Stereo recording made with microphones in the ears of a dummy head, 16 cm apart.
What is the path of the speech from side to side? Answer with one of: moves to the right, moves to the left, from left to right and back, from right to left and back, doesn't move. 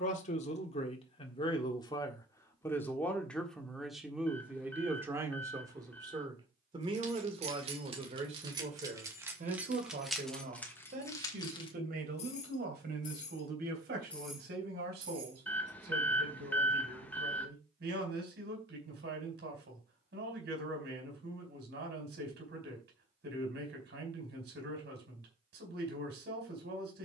moves to the right.